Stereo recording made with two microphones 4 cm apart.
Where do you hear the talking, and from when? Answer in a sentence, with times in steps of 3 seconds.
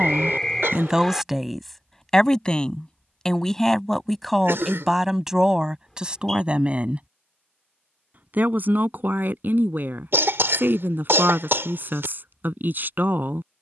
You can hear the talking in the centre from 0 s and on the right from 6 s.